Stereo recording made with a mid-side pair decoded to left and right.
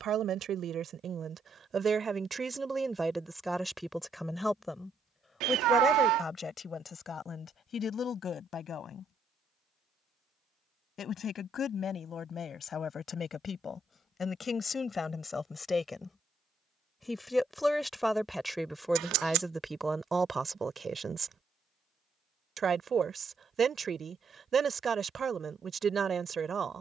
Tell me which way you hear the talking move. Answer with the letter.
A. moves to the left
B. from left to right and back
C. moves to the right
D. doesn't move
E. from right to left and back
E.